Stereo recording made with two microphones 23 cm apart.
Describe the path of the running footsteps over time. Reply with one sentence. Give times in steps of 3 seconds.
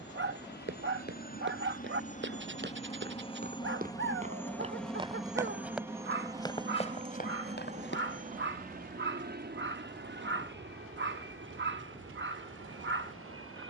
In this clip you hear the running footsteps on the right from 0 s, on the left from 6 s and not at all from 9 s.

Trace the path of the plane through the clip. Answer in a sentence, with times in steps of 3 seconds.
In this clip you hear the plane on the left from 0 s, in the centre from 3 s and on the right from 6 s.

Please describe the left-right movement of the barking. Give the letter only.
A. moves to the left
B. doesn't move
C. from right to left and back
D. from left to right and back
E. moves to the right
B.